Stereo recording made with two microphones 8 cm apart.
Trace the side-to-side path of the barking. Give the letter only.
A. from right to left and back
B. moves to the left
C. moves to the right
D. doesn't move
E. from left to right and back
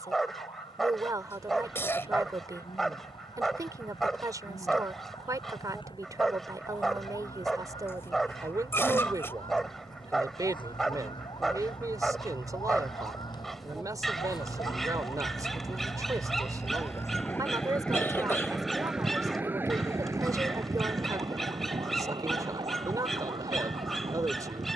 D.